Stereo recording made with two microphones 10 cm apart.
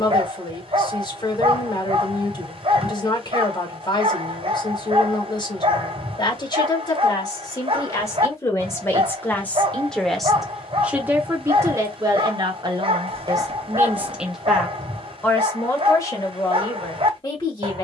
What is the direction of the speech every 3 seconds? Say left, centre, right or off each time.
left, left, left, centre, right, left.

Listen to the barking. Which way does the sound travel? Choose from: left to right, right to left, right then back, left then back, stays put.
stays put.